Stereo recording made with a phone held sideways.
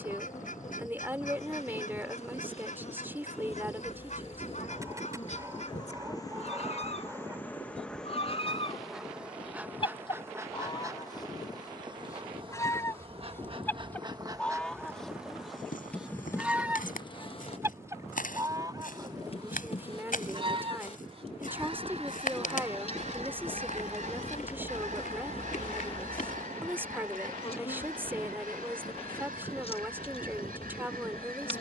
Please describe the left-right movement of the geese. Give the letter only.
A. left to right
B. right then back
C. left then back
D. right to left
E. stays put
A.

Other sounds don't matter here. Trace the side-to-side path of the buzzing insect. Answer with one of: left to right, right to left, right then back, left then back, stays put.
right then back.